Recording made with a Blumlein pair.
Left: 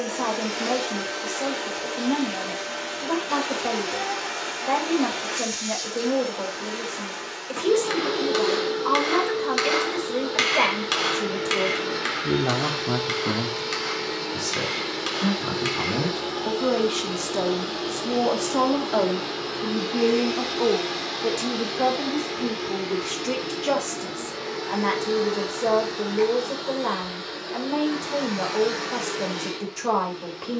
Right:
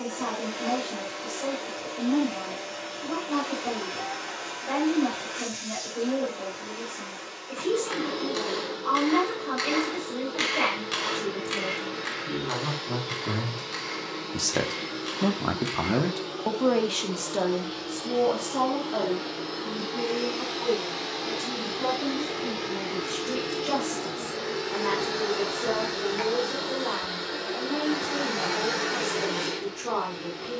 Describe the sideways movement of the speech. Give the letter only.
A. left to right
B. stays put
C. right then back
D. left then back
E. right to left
C.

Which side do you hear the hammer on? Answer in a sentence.
In this clip you hear the hammer on the left.